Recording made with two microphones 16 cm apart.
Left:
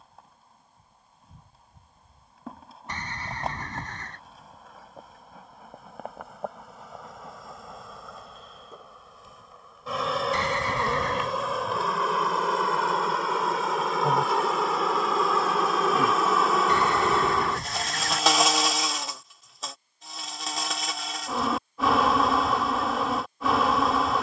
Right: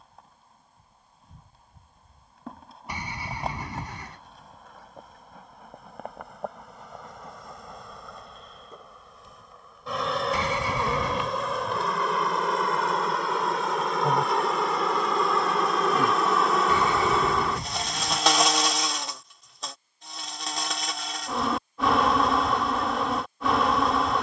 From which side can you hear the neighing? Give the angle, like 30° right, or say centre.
10° right.